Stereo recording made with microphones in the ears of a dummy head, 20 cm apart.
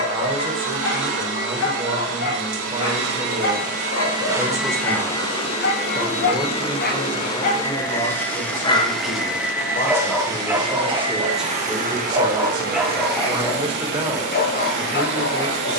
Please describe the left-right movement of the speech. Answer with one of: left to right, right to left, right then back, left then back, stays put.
left then back.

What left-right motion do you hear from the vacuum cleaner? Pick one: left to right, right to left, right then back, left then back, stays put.
left then back.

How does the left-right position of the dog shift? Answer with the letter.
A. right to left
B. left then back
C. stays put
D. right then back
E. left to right
D.